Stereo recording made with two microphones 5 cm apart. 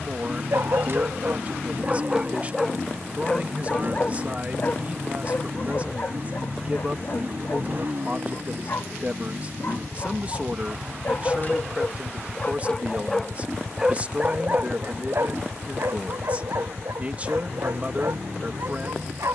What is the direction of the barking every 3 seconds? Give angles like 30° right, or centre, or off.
20° right, 40° left, 50° left, 40° left, 10° right, 70° right, 80° right.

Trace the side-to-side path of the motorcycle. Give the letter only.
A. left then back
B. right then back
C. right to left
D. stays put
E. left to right
D.